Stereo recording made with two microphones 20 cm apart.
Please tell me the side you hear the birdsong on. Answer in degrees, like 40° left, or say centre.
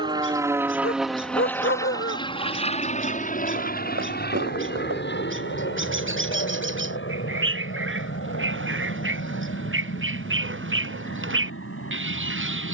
90° right.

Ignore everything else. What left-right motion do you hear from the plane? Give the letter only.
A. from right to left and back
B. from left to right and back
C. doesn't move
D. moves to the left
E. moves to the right
D.